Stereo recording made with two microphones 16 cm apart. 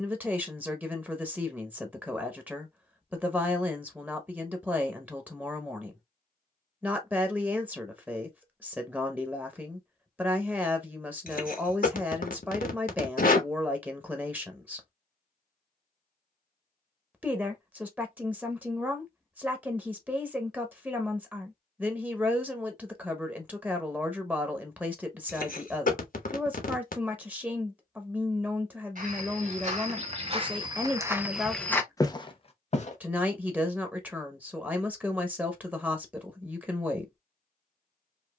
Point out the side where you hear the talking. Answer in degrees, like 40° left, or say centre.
10° right.